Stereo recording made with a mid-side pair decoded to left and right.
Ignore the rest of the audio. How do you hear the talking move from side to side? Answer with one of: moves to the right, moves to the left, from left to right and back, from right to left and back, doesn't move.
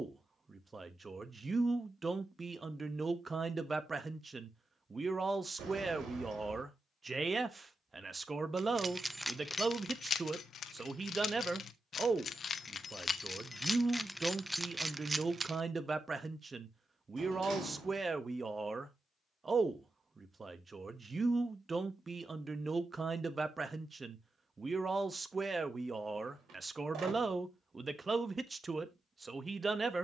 doesn't move.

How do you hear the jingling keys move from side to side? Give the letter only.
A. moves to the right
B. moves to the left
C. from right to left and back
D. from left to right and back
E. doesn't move
C.